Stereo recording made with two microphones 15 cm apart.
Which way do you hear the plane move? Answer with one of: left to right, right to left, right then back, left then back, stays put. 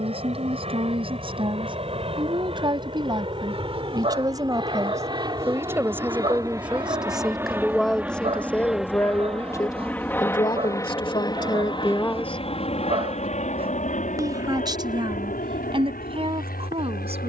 right to left.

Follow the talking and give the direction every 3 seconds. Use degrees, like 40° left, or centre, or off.
40° right, 20° right, centre, 30° left, 10° right, 40° right.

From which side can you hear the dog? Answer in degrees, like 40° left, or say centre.
40° right.